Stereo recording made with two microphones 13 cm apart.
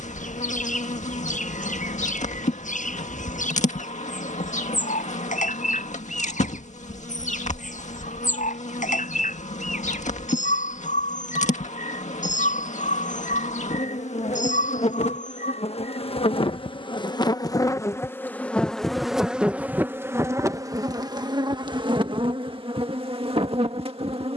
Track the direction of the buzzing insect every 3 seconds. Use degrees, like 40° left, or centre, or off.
70° left, 70° left, 70° left, 70° left, 70° left, 40° left, 10° right, 40° right.